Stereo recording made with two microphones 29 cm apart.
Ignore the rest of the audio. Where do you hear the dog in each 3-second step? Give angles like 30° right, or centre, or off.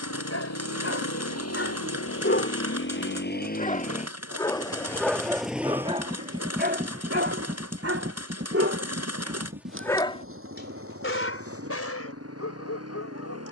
50° left, centre, 40° right, 30° left, 60° left.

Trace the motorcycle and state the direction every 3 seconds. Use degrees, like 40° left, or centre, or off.
60° left, 10° left, 30° right, 50° right, 50° right.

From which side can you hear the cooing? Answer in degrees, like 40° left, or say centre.
60° right.